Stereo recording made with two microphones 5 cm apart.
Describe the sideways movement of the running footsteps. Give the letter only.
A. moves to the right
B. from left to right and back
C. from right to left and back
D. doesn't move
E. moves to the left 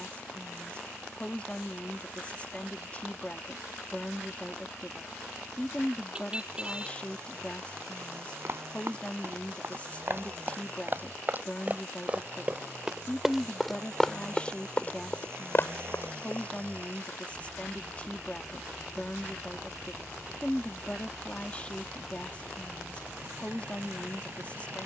E.